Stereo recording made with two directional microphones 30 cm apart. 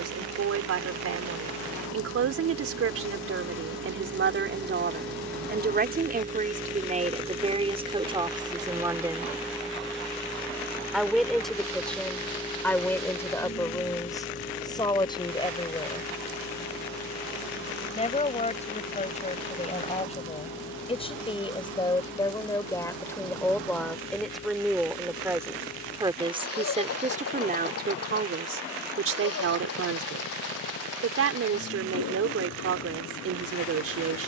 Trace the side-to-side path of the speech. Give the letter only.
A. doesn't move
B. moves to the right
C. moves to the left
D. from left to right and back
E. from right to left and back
E.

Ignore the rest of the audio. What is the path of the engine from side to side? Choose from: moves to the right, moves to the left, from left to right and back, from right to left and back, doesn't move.
moves to the left.